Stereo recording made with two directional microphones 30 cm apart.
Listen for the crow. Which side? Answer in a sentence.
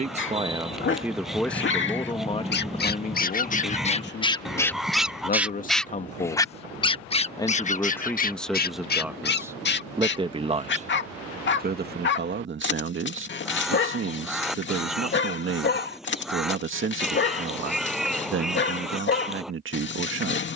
In this clip you hear the crow in the centre.